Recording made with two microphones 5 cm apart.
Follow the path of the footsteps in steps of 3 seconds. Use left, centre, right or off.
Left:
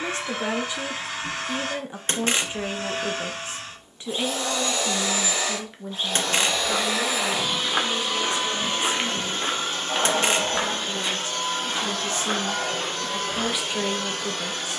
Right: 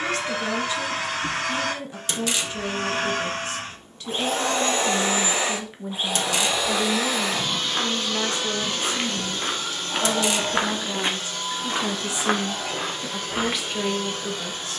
off, off, left, right, right.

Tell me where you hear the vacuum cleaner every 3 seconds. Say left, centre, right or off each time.
right, right, centre, left, left.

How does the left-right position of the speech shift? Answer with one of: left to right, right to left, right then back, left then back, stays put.
right then back.